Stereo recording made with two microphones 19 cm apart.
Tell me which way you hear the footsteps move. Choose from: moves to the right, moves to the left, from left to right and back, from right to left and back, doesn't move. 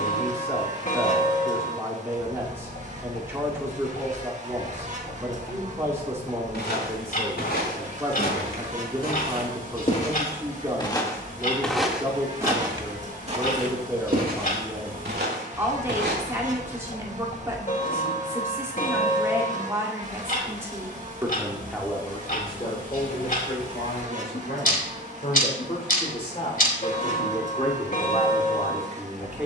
moves to the right.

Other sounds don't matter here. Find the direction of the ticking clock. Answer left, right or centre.
left.